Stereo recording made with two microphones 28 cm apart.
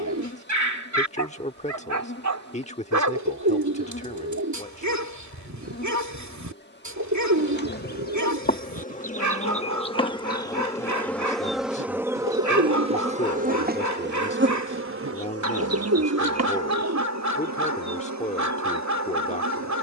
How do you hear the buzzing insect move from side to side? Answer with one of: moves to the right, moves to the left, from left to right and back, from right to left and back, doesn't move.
moves to the right.